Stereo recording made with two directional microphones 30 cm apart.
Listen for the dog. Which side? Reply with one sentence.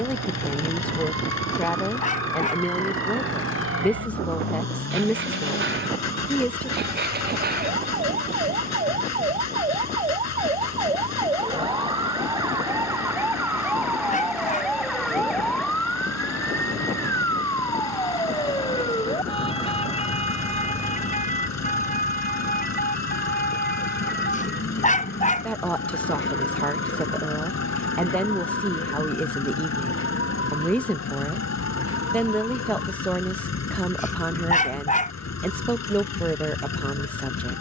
You can hear the dog on the left.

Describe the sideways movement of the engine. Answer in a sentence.
In this clip you hear the engine stay in one place.